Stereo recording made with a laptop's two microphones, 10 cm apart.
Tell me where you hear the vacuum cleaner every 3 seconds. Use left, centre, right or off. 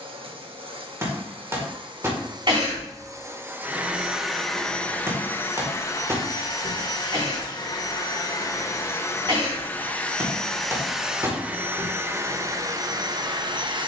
right, centre, left, centre, right.